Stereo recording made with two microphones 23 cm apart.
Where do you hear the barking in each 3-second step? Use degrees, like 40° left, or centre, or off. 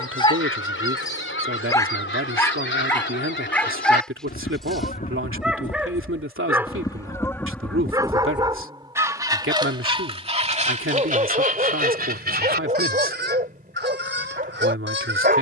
20° left, centre, 10° right, 30° right, 30° right.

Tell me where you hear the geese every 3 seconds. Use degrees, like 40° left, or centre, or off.
60° left, 40° left, 10° left, 30° right, 50° right.